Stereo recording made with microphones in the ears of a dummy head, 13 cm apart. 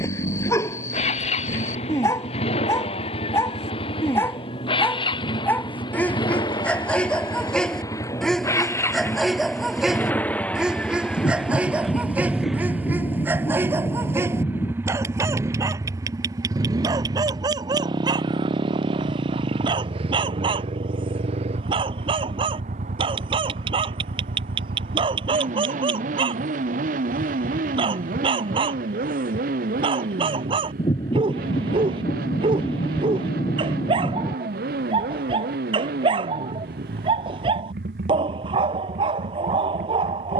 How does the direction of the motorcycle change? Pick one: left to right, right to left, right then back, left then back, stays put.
left to right.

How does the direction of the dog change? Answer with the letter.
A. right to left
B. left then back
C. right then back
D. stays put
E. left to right
E.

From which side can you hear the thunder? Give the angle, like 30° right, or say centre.
30° left.